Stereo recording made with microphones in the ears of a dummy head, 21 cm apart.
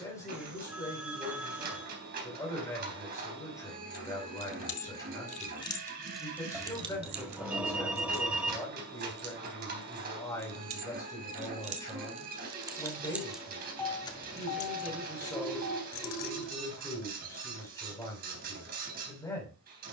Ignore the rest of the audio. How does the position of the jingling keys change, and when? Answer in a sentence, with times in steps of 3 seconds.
You can hear the jingling keys not at all from 0 s, on the left from 3 s, on the right from 6 s, in the centre from 12 s, on the left from 15 s and not at all from 18 s.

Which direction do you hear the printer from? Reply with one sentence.
You can hear the printer on the right.